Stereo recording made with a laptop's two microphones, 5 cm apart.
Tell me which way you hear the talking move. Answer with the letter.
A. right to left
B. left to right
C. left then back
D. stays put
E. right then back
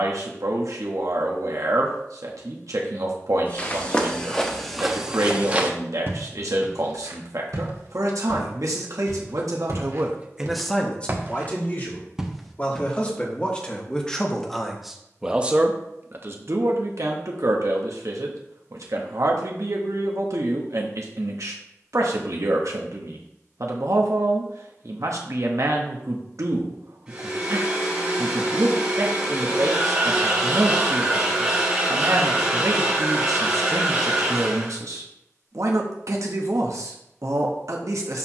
C.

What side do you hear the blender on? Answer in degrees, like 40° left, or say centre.
20° right.